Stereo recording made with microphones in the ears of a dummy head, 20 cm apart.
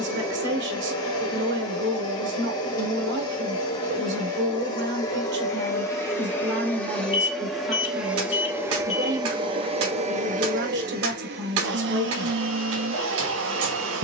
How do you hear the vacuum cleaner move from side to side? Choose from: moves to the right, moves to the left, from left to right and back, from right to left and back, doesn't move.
moves to the right.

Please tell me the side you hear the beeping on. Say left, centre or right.
left.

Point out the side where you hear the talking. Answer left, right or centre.
right.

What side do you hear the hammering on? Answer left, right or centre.
right.